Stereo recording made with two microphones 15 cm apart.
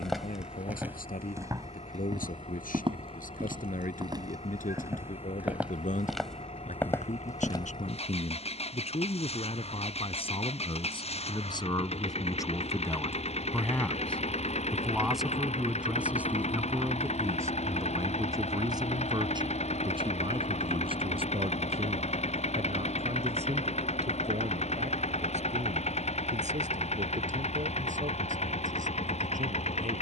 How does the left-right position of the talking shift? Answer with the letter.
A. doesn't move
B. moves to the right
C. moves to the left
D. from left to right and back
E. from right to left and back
B.